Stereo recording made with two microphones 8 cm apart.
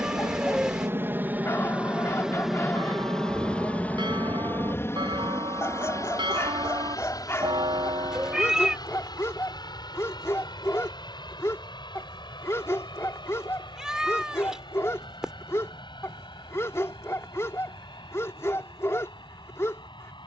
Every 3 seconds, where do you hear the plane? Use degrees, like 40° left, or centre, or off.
20° right, 30° left, 50° left, 60° left, 70° left, 70° left, 70° left.